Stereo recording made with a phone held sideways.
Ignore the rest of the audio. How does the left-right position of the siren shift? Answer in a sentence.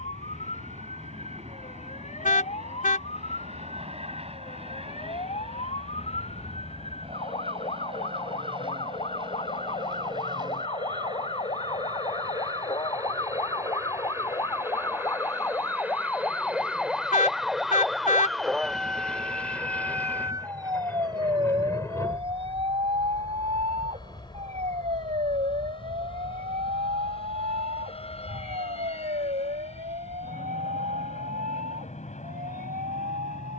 You can hear the siren move to the right.